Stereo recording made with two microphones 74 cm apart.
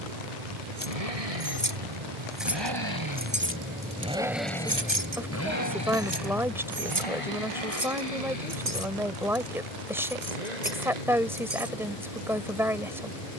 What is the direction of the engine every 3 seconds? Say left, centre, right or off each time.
right, centre, left, left, left.